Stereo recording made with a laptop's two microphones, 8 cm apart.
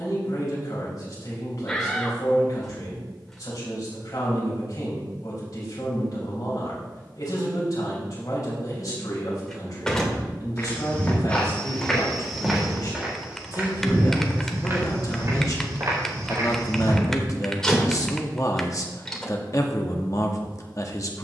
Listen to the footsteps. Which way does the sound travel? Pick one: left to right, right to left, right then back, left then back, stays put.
left to right.